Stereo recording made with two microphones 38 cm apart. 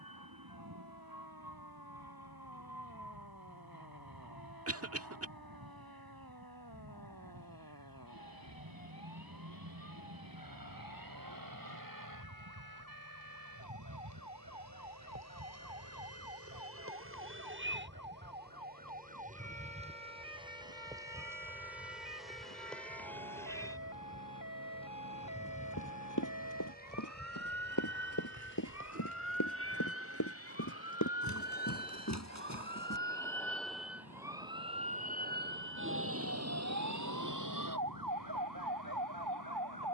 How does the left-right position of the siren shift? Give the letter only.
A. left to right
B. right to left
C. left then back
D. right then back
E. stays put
A.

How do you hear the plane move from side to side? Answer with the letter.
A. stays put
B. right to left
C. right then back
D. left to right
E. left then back
B.